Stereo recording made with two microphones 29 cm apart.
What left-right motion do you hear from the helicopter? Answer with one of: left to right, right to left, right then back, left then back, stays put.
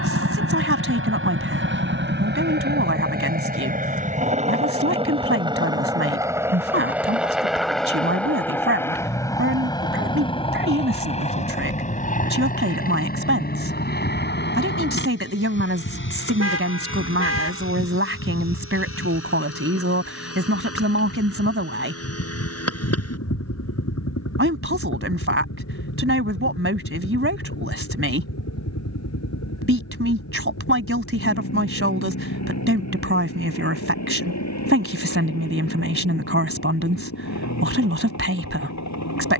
right to left.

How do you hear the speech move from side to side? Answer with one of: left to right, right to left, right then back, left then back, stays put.
stays put.